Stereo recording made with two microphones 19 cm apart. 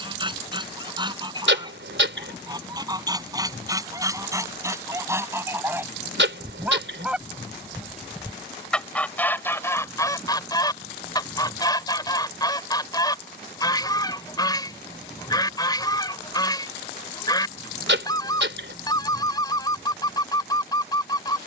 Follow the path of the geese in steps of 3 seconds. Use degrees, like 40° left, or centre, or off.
20° right, 20° right, centre, 20° left, 20° left, 20° left, 20° left.